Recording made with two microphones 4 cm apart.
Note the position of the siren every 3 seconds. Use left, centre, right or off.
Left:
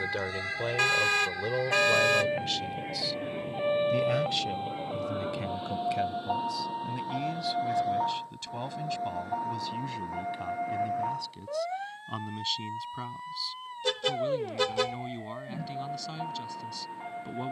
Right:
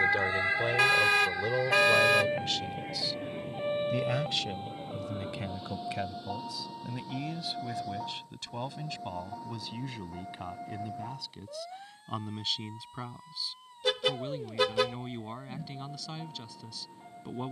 centre, left, left, left, left, left.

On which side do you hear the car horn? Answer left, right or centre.
centre.